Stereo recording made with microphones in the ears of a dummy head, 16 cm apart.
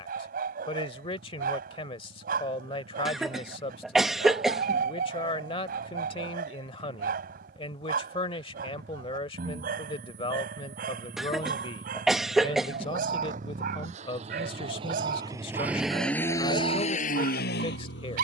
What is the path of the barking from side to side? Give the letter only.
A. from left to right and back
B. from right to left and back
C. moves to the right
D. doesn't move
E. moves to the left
D.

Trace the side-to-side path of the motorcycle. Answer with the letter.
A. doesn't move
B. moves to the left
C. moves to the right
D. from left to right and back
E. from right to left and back
B.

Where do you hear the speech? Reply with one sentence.
You can hear the speech on the left.